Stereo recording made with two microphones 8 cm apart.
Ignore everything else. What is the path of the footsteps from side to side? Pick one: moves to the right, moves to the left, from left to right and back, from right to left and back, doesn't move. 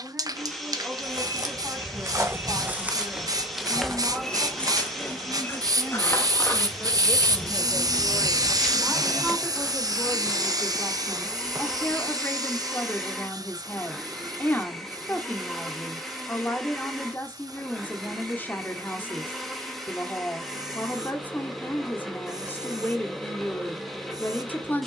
from right to left and back.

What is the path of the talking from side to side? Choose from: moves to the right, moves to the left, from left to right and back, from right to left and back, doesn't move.
moves to the left.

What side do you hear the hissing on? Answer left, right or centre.
right.